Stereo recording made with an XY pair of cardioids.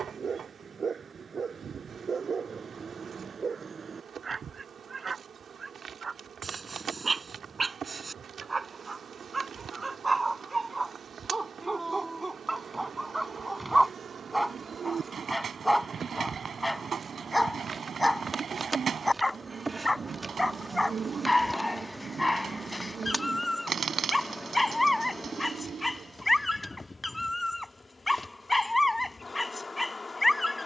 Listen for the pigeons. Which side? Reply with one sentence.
You can hear the pigeons on the right.